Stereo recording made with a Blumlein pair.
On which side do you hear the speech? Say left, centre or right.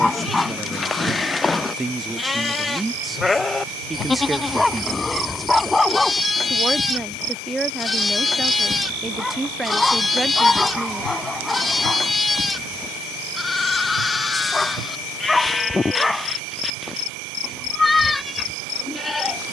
centre.